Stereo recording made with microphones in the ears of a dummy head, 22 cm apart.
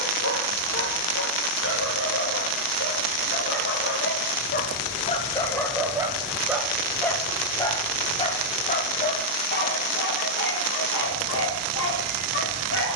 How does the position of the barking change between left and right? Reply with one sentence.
In this clip you hear the barking move from left to right and back again.